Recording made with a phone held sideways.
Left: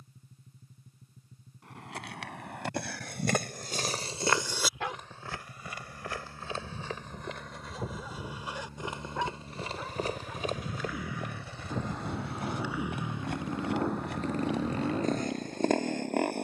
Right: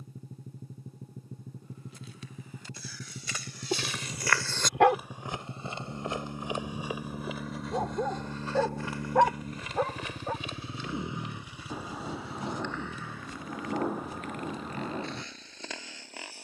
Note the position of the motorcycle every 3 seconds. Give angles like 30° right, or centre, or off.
80° right, 70° right, 60° right, 30° right, 20° left, 50° left.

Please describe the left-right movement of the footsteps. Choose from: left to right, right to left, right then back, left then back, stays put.
right then back.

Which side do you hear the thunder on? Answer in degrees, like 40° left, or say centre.
10° right.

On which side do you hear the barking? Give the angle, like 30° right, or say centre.
70° right.